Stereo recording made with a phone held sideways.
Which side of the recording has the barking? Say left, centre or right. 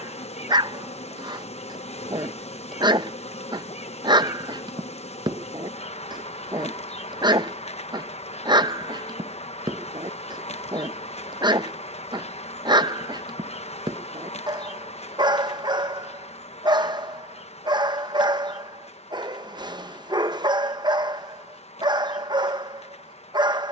right.